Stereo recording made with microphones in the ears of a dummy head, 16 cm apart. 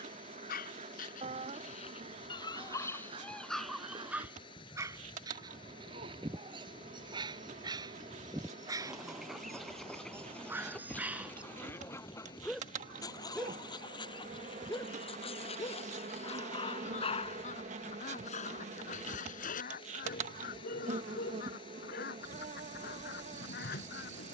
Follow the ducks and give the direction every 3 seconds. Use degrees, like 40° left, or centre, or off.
40° right, 30° right, 10° right, 10° left, 30° left, 40° left, 50° left, 60° left.